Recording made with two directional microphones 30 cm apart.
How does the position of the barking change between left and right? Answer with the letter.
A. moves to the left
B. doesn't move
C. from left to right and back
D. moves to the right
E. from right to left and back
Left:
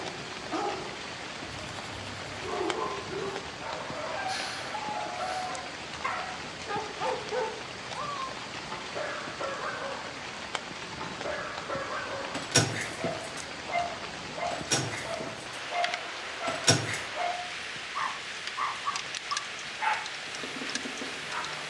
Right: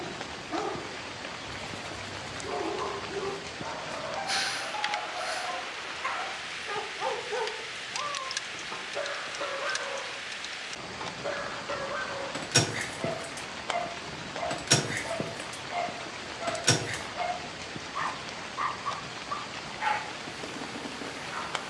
B.